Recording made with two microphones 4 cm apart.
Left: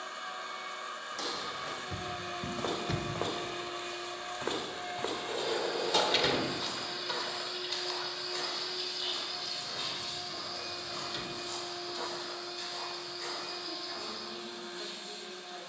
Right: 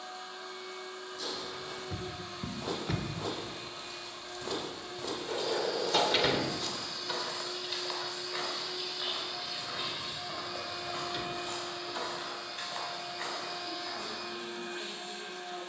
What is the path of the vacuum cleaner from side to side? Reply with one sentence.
In this clip you hear the vacuum cleaner move to the right.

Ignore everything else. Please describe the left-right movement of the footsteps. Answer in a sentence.
You can hear the footsteps go from the left side to the right.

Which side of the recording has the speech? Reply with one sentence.
You can hear the speech in the centre.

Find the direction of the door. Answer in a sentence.
You can hear the door in the centre.